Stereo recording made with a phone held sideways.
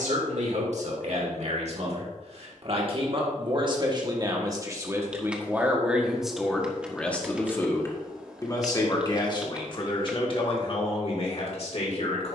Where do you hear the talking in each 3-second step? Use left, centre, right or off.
right, right, centre, left.